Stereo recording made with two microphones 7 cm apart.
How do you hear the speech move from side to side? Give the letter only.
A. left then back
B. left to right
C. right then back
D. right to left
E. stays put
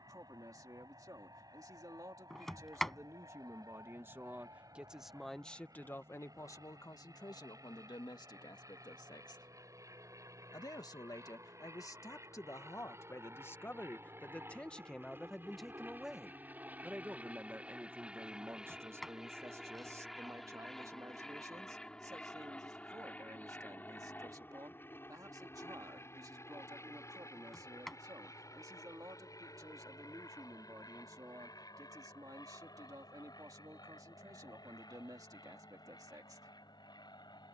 A.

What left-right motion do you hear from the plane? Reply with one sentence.
You can hear the plane travel towards the left.